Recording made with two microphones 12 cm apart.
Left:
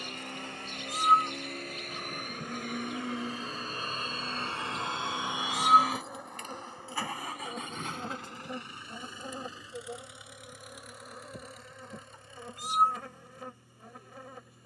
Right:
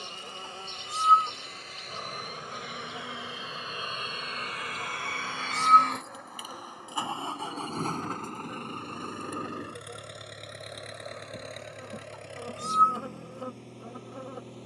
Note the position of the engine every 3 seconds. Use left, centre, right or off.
left, left, right, right, right.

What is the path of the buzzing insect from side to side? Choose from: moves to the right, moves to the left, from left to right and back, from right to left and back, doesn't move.
from right to left and back.